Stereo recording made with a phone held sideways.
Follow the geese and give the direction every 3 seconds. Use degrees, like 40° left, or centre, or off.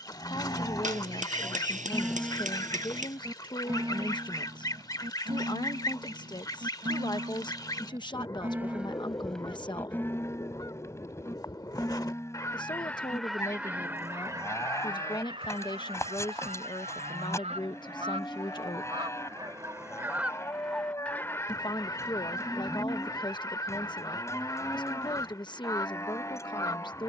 20° left, 20° left, 20° left, 20° left, centre, 40° right, 20° right, 20° left, 20° left.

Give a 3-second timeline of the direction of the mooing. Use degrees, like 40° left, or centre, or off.
10° left, 30° right, 30° right, 10° left, 20° left, 20° left, 20° left, 20° left, 20° left.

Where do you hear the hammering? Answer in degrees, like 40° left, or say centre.
50° right.